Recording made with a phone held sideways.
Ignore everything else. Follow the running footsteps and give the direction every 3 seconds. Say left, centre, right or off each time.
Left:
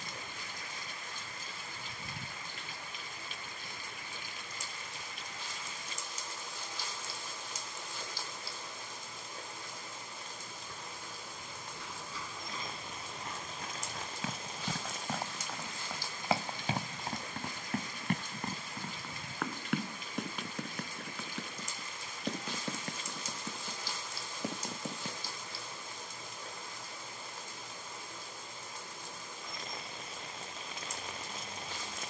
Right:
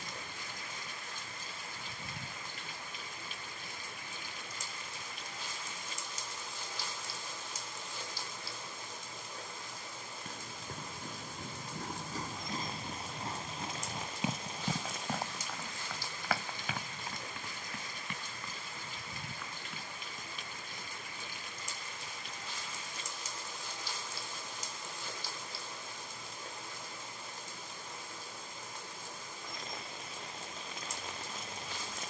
off, off, off, right, right, left, left, left, left, off, off.